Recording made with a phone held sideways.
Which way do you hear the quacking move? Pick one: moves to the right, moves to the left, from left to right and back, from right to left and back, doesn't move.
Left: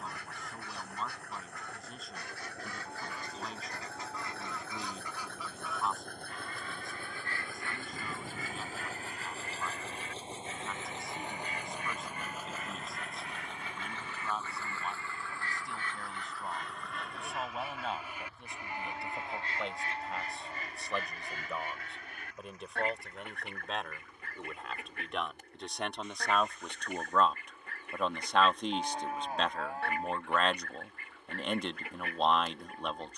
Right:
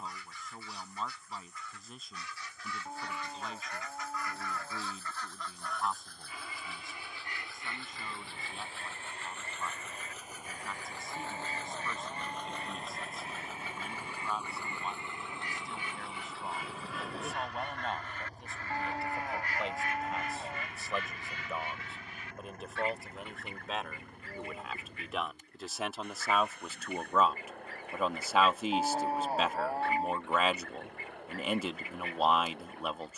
from left to right and back.